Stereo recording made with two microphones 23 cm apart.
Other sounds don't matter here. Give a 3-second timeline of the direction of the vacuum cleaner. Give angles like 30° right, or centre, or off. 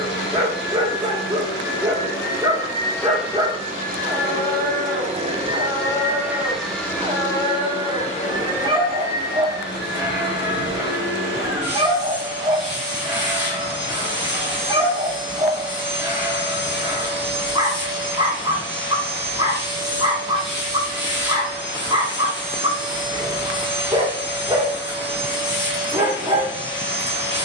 40° left, 30° right, 20° left, 50° left, 50° left, 50° left, 50° left, 50° left, 50° left.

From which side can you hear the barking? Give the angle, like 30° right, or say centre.
20° right.